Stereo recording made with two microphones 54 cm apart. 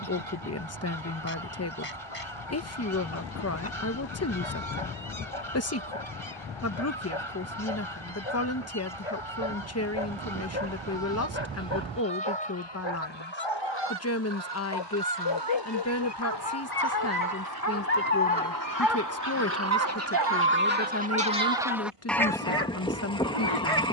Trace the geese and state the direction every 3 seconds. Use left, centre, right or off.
right, right, right, right, right, right, right, centre.